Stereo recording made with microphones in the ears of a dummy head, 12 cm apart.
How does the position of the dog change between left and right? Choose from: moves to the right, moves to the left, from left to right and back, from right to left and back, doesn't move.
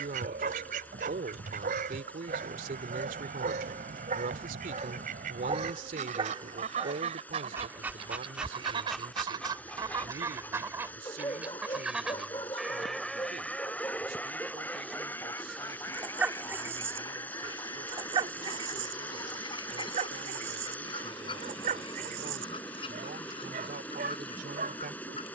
from right to left and back.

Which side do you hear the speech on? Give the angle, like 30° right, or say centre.
70° right.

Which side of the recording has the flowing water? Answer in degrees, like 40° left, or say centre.
10° left.